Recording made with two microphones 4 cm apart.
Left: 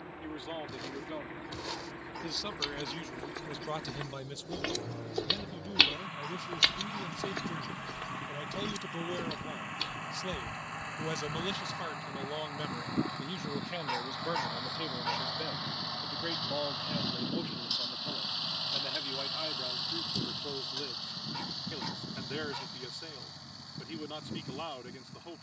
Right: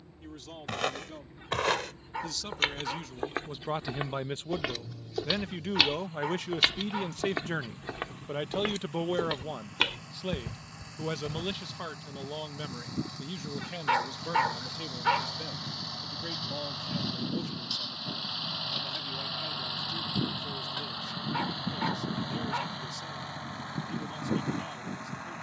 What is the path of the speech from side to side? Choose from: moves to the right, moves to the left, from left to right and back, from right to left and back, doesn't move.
from left to right and back.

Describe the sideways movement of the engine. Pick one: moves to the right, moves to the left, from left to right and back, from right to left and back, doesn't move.
moves to the right.